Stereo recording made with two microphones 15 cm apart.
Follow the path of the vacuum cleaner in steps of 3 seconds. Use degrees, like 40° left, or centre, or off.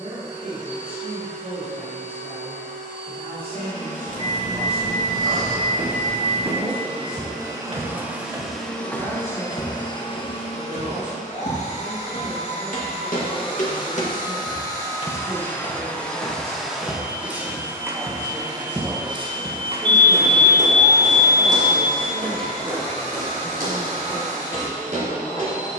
50° right, 50° right, 20° right, 40° left, 30° left, centre, 30° right, 50° right, 50° right.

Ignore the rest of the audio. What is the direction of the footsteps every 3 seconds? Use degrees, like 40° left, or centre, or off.
off, 70° right, 40° right, 50° left, 60° left, 10° left, 40° right, 60° right, 70° right.